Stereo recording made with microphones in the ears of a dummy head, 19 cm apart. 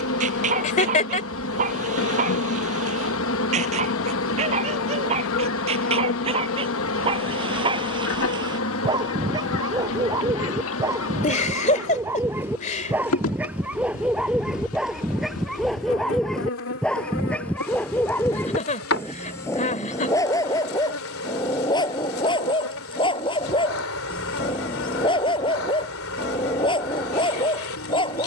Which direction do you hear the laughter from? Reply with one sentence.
In this clip you hear the laughter on the left.